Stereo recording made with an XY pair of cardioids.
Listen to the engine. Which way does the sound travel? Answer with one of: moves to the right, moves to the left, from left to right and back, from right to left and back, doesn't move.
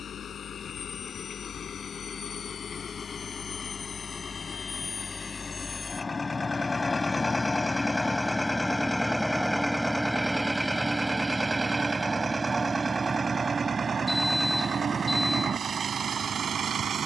moves to the right.